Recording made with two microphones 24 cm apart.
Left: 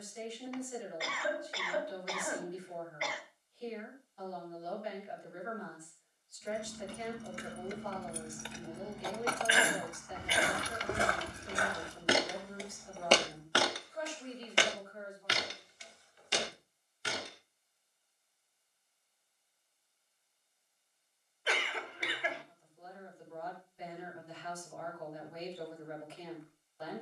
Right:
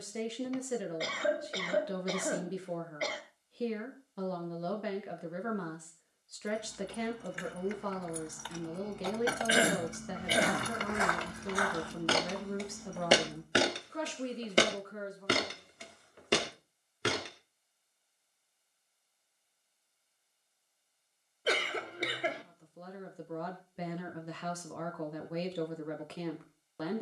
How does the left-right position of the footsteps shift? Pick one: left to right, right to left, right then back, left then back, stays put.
left to right.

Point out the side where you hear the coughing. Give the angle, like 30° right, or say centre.
40° right.